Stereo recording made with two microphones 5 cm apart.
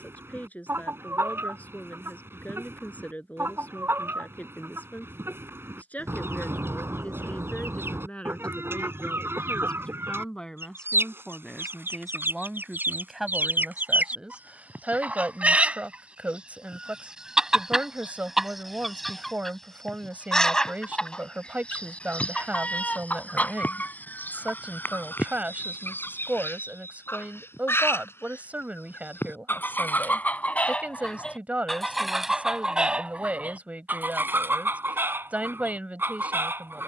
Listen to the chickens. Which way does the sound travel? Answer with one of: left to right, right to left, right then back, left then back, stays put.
left then back.